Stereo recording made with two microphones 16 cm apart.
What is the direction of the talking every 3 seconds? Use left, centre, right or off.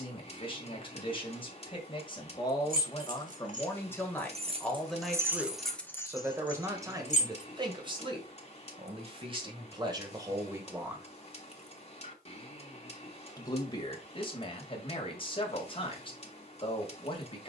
left, centre, right, right, left, left.